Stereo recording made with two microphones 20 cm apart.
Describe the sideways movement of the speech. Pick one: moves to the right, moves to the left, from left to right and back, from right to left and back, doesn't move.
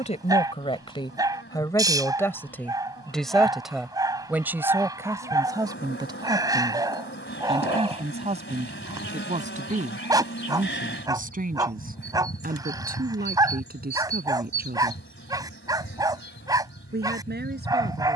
moves to the right.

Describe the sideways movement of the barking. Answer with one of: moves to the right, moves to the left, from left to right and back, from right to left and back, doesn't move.
doesn't move.